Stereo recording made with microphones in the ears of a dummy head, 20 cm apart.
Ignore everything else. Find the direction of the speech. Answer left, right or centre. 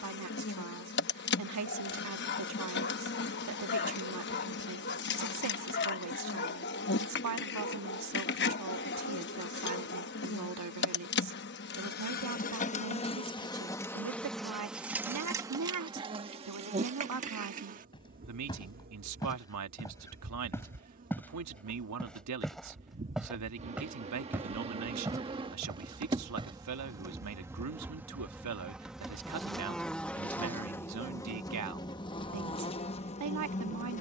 right.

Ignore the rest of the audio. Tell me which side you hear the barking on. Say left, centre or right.
left.